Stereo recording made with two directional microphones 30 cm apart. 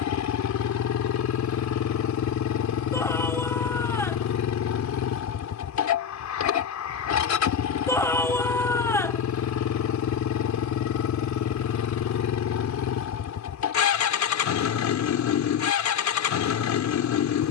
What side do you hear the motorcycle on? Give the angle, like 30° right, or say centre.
60° left.